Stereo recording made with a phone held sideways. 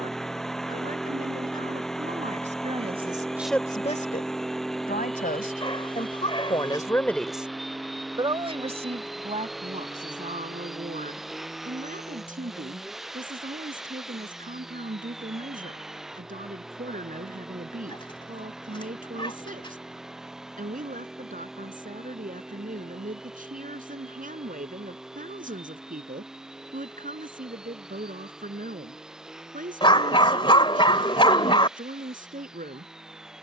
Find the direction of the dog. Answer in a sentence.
In this clip you hear the dog on the left.